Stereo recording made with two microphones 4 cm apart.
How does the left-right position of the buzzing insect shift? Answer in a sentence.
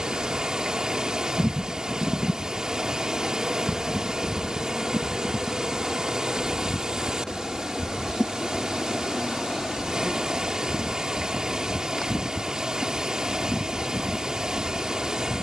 You can hear the buzzing insect go from the right side to the left.